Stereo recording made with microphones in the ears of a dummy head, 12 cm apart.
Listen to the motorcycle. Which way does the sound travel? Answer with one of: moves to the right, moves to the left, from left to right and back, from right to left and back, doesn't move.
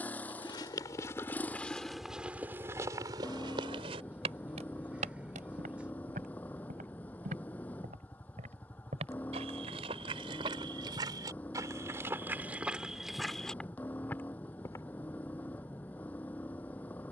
doesn't move.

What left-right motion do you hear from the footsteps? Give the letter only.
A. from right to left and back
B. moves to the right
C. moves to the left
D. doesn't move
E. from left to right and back
E.